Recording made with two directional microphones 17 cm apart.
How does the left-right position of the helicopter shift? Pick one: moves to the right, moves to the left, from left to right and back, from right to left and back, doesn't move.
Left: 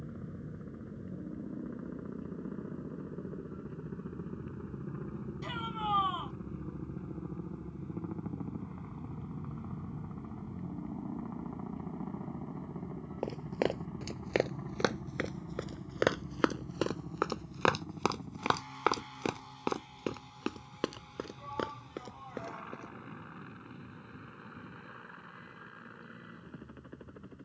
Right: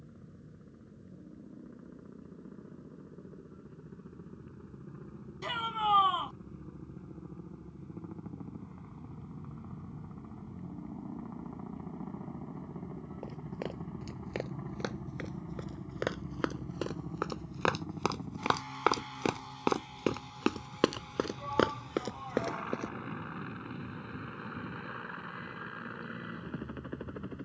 moves to the right.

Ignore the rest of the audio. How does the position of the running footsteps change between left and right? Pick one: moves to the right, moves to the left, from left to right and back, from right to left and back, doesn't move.
moves to the right.